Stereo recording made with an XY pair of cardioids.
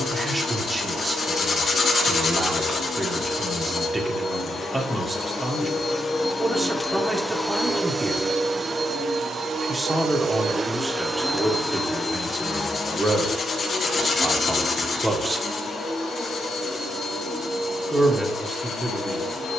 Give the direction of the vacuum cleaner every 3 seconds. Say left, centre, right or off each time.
left, left, centre, right, left, left, left.